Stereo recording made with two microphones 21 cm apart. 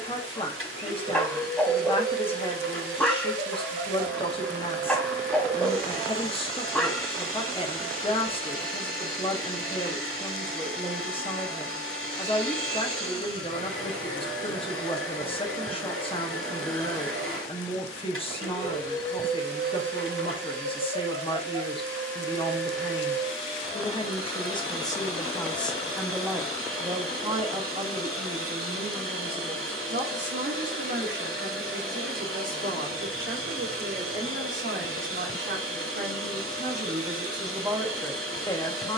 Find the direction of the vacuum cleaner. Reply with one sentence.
In this clip you hear the vacuum cleaner on the right.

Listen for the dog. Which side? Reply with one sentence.
In this clip you hear the dog in the centre.